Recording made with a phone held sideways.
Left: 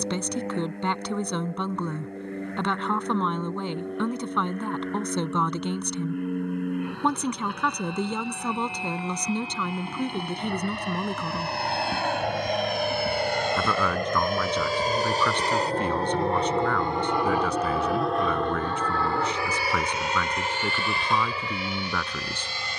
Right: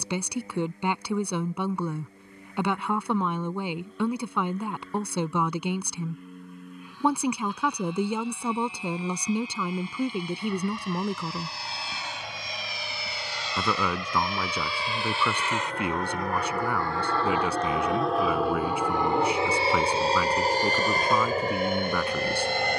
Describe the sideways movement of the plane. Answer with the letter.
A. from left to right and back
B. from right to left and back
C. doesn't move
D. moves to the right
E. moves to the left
D.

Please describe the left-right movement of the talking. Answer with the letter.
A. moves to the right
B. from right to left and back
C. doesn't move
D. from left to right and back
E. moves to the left
C.